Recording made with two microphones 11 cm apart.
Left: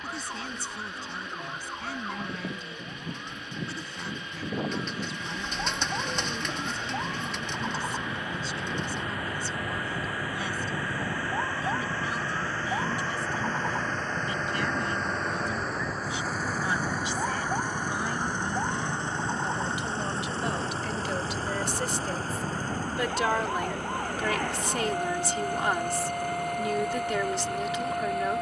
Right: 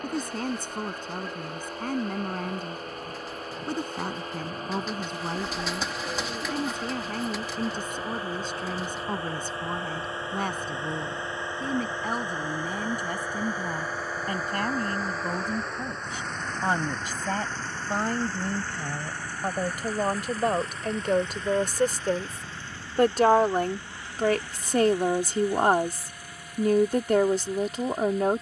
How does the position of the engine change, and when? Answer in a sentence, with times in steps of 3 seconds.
In this clip you hear the engine on the right from 0 s, in the centre from 12 s and on the left from 18 s.